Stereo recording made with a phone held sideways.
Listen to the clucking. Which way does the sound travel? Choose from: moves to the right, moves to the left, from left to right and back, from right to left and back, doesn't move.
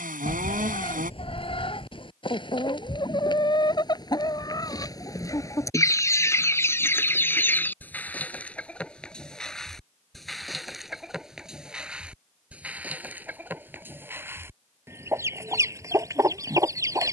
moves to the right.